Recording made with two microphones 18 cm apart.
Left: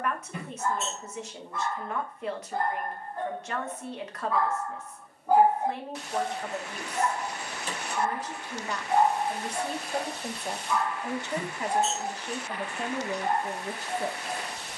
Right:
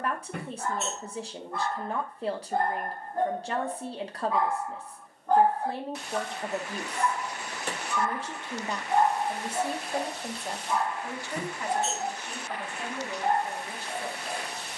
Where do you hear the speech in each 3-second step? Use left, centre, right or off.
right, right, right, centre, left.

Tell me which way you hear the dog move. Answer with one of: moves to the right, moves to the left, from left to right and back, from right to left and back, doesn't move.
from right to left and back.